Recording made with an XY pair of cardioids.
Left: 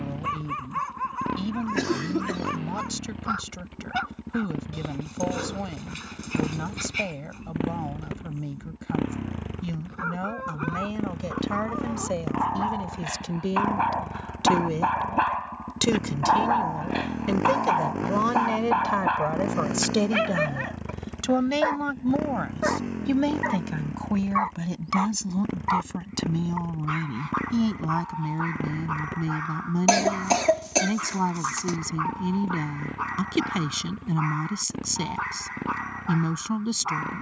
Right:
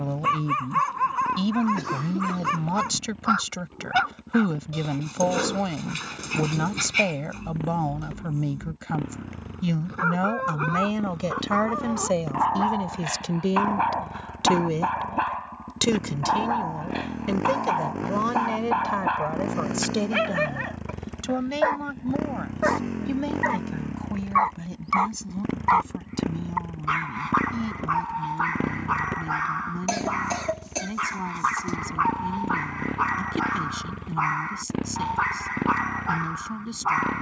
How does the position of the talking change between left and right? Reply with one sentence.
You can hear the talking go from the right side to the left.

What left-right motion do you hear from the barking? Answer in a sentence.
You can hear the barking move from right to left and back again.